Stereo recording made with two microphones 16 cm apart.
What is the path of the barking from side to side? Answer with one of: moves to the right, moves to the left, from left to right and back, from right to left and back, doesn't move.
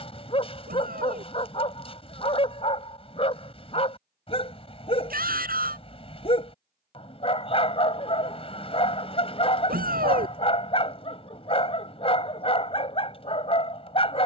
doesn't move.